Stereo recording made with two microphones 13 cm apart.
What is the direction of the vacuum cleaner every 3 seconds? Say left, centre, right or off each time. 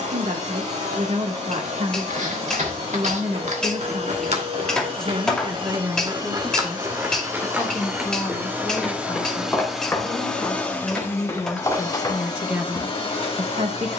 right, right, right, centre, left.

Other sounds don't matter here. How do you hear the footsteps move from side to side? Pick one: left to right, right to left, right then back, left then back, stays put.
right to left.